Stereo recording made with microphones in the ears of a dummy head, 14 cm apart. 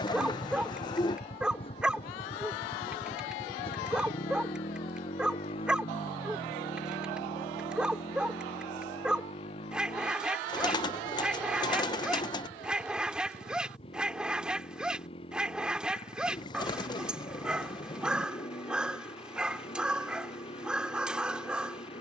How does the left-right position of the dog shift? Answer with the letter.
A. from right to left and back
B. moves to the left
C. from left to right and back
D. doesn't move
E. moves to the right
D.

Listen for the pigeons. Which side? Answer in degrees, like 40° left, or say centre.
30° left.